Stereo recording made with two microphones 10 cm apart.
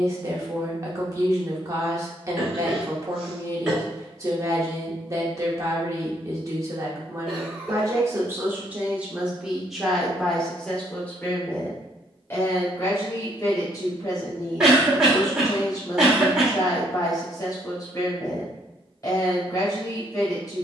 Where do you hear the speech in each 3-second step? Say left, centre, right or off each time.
right, right, right, centre, left, left, left.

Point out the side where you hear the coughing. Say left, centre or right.
centre.